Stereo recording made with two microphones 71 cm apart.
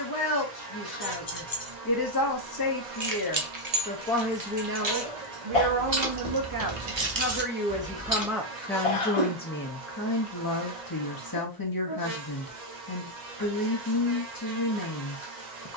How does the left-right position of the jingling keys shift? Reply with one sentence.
You can hear the jingling keys go right and come back.